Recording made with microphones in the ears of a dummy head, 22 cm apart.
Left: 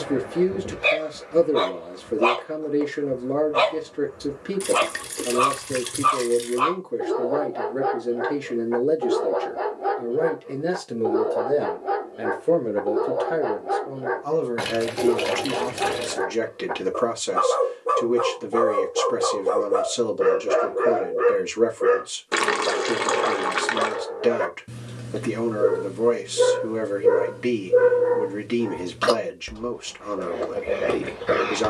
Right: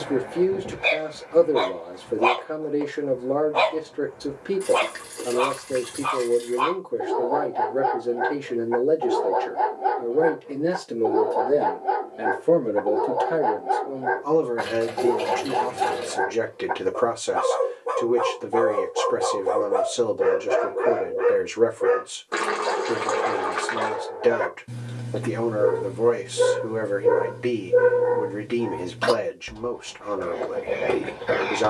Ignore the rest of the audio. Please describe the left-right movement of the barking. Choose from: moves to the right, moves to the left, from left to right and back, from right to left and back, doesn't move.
doesn't move.